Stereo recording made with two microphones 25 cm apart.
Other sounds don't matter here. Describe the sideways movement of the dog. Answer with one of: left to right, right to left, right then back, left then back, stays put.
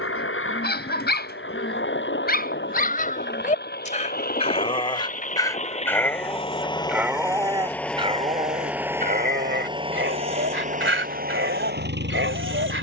left to right.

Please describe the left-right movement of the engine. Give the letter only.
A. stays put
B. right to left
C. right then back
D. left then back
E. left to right
E.